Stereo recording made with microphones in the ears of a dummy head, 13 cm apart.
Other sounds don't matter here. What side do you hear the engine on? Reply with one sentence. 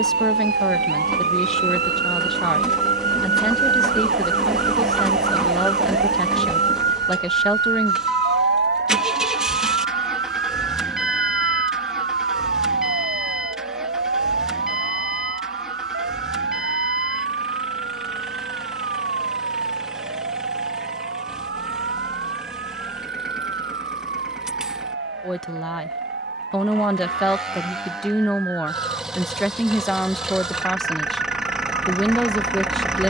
You can hear the engine in the centre.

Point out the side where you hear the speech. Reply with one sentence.
In this clip you hear the speech in the centre.